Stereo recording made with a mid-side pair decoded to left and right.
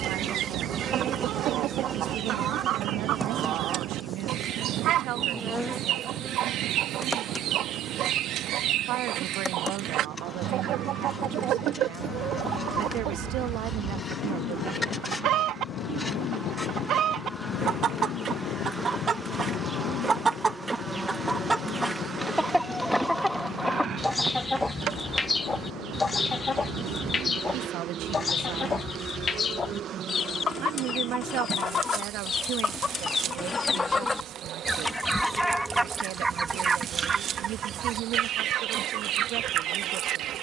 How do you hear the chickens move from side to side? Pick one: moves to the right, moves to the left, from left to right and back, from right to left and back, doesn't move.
from right to left and back.